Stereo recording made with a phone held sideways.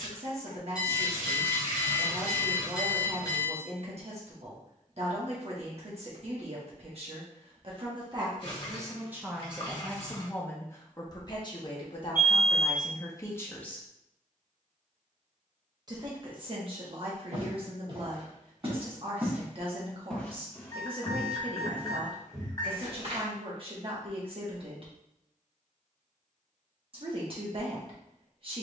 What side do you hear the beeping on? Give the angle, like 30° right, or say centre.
30° left.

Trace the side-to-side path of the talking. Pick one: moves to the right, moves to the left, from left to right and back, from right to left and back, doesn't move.
from right to left and back.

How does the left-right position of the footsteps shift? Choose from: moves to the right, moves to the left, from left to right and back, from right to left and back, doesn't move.
from right to left and back.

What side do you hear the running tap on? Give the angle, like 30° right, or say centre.
40° left.